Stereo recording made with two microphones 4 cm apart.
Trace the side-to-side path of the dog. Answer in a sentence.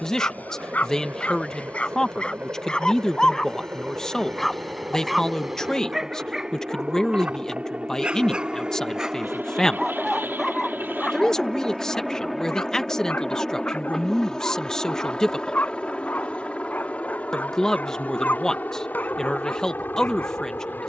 You can hear the dog go right and come back.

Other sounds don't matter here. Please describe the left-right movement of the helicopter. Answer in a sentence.
You can hear the helicopter move from right to left.